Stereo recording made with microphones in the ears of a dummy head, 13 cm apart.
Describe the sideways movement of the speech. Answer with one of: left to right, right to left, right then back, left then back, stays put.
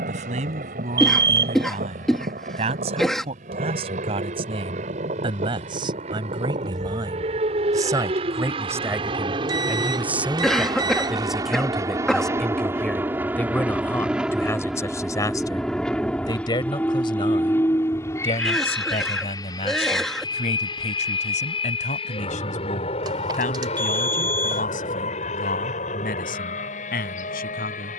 right to left.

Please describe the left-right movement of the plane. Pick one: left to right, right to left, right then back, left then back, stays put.
right to left.